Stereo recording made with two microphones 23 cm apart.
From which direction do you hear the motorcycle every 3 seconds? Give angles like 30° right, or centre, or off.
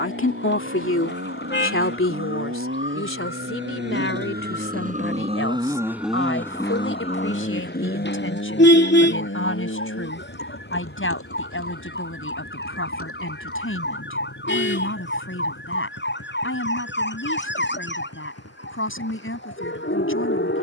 70° right, 40° right, 30° left, 70° left, 70° left, 80° left, 80° left.